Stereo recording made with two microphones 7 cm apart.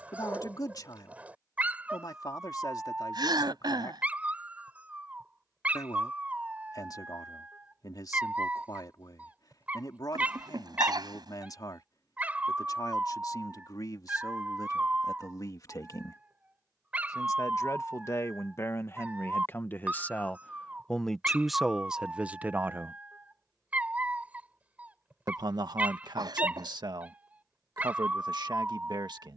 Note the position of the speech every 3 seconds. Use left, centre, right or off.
left, left, left, left, left, left, left, centre, right, right.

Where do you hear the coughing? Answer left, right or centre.
right.